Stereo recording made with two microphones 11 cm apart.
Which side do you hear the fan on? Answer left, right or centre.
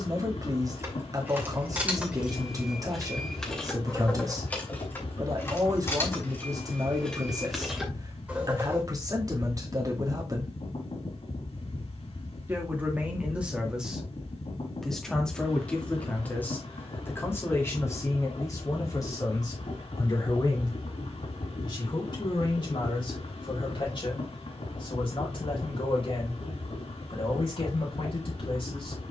left.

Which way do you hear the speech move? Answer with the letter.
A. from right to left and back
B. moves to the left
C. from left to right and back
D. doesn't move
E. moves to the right
B.